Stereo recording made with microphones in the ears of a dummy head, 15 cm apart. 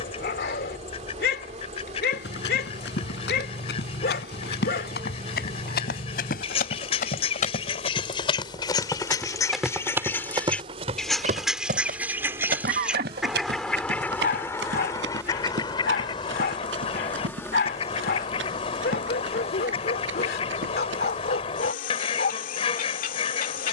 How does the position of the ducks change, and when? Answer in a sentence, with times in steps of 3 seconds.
You can hear the ducks on the left from 0 s, in the centre from 9 s and on the left from 15 s.